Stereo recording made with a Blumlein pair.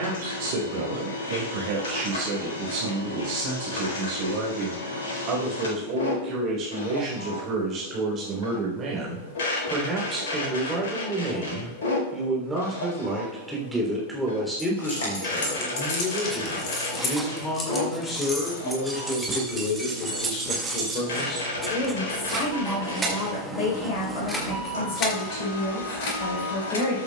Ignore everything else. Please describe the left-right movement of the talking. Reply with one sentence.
In this clip you hear the talking travel towards the left.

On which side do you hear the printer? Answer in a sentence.
In this clip you hear the printer on the left.